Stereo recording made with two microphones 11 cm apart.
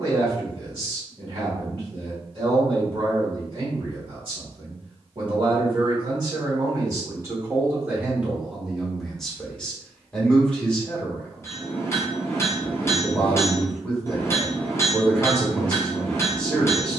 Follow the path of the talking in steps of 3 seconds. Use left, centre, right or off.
right, right, right, centre, centre, centre.